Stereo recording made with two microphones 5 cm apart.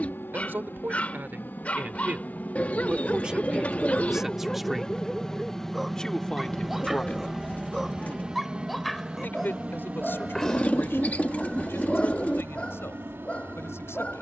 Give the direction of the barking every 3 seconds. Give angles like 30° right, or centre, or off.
30° left, 10° left, centre, 10° left, 30° left.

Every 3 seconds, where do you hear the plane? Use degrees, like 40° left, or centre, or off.
50° left, 20° left, 10° right, 30° right, 40° right.